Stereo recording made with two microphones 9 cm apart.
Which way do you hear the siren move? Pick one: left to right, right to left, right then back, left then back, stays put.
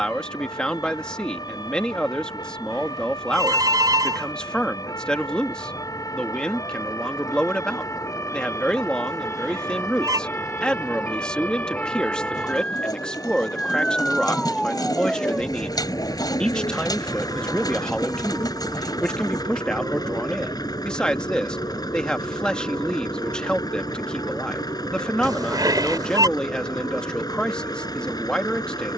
left to right.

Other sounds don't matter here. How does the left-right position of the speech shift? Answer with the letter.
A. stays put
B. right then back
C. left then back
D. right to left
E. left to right
A.